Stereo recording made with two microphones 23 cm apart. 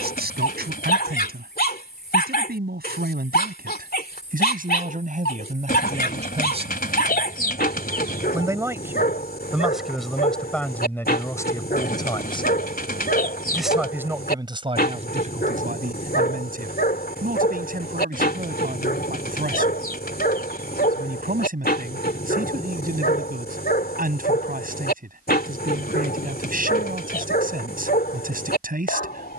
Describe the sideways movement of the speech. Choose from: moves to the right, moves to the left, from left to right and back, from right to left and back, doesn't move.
from right to left and back.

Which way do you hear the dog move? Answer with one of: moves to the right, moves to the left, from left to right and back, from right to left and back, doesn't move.
doesn't move.